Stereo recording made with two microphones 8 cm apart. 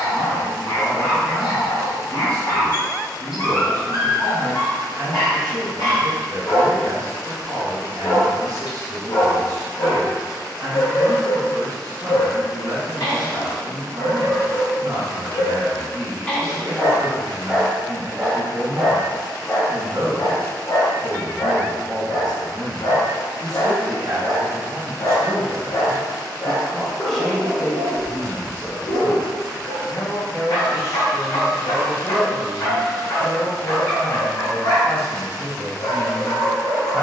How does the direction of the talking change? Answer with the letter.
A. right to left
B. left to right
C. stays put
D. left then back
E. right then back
A.